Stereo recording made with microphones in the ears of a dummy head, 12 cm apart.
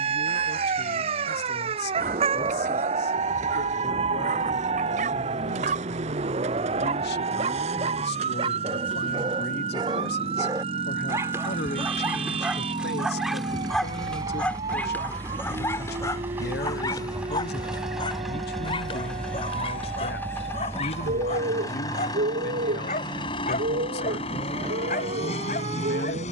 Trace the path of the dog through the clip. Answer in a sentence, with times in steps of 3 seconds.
You can hear the dog on the right from 0 s, in the centre from 12 s and on the left from 15 s.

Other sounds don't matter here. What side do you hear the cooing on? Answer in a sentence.
In this clip you hear the cooing on the right.